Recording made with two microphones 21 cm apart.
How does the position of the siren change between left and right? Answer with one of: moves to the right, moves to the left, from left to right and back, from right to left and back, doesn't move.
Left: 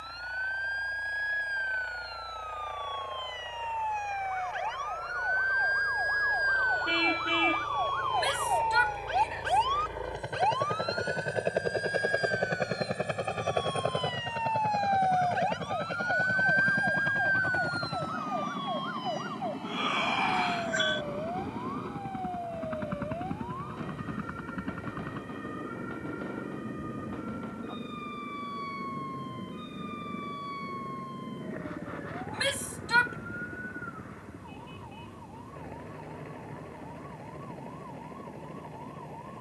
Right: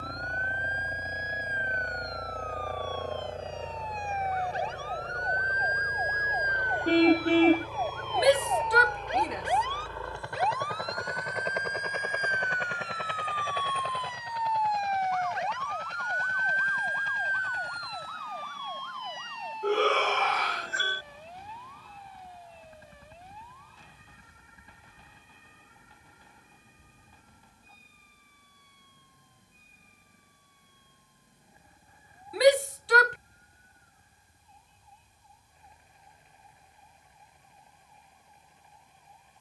moves to the left.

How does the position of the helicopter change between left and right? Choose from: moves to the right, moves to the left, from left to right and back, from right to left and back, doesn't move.
moves to the left.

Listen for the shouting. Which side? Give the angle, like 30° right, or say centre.
70° right.